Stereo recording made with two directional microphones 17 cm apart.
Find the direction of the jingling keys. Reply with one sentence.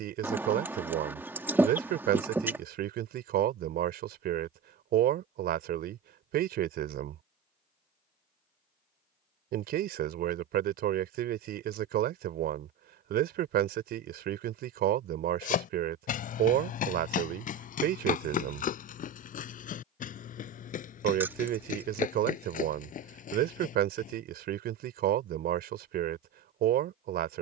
In this clip you hear the jingling keys in the centre.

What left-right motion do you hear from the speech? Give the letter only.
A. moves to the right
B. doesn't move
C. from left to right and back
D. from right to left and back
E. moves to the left
B.